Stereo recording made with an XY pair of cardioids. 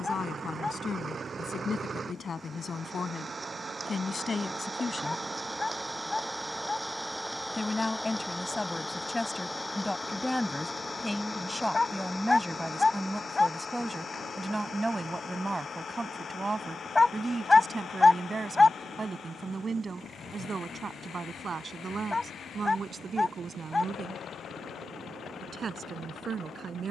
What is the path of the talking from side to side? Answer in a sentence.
You can hear the talking travel towards the right.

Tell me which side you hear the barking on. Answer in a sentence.
In this clip you hear the barking on the left.